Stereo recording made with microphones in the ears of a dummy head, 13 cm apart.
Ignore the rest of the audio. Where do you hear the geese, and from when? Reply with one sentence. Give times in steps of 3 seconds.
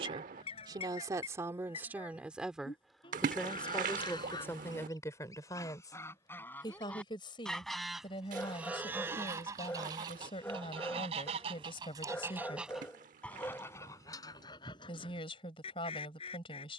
You can hear the geese on the left from 0 s, in the centre from 6 s, on the right from 9 s, in the centre from 12 s and on the left from 15 s.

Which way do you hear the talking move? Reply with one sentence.
In this clip you hear the talking go from the right side to the left.